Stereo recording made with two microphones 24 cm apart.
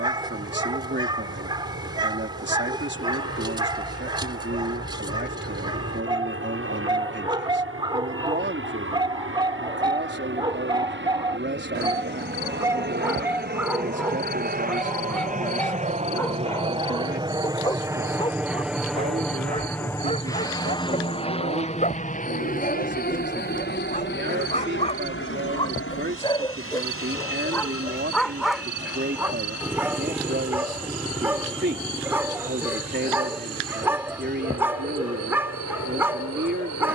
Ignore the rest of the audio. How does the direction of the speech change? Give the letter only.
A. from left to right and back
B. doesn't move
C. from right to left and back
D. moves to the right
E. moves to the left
B.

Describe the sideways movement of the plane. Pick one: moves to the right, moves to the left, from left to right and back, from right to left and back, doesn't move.
moves to the left.